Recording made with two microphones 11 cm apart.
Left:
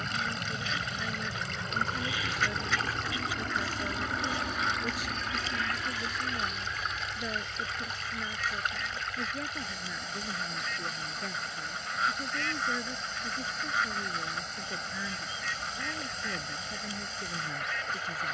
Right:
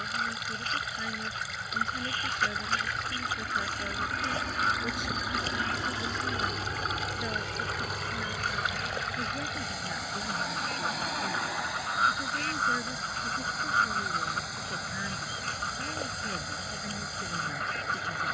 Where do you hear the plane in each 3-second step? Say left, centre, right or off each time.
left, centre, right, right, right, right.